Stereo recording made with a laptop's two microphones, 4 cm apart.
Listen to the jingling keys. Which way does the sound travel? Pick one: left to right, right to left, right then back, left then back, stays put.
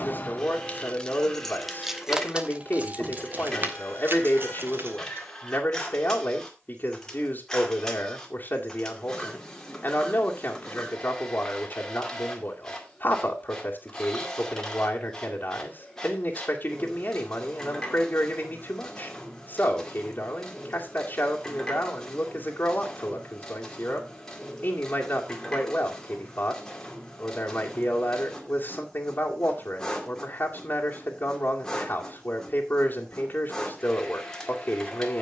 left to right.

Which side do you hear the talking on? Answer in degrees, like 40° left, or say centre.
40° left.